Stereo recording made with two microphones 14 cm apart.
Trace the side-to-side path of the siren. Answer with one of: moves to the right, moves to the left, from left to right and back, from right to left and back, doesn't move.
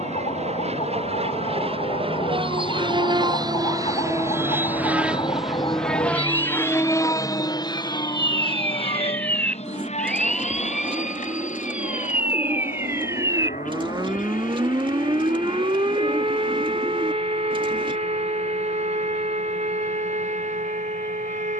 moves to the right.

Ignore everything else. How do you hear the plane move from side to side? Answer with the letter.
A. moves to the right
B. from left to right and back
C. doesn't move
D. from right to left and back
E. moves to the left
E.